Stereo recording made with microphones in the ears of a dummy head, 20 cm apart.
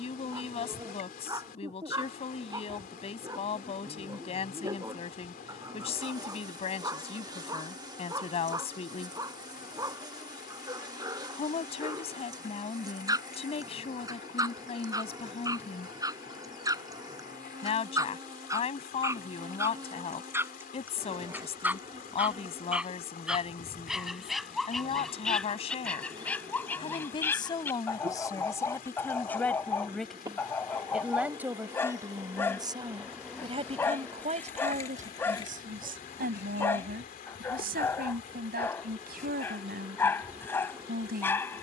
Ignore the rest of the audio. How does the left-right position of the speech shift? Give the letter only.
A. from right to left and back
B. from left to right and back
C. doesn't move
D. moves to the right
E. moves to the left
D.